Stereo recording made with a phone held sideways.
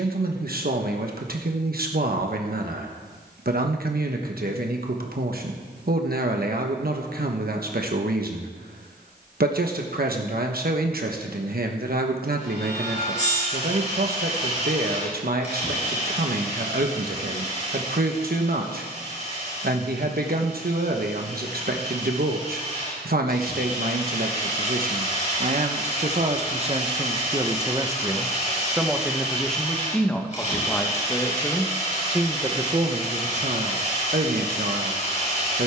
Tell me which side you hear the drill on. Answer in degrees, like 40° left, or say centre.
40° left.